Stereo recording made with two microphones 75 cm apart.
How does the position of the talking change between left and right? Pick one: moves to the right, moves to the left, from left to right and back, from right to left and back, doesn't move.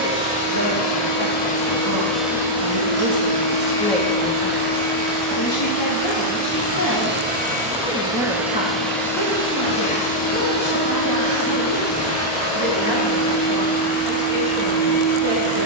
from right to left and back.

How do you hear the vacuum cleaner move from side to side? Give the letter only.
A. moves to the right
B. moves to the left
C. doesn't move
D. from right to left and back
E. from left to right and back
E.